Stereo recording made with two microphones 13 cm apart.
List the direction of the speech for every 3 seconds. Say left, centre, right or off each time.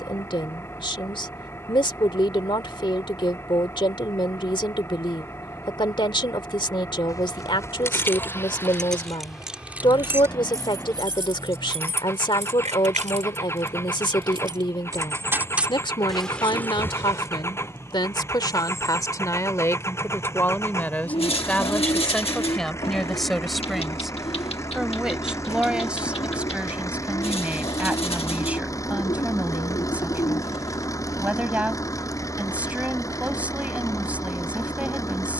left, left, left, left, left, left, left, centre, centre, centre, centre, centre.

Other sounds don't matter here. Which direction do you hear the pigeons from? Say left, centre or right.
left.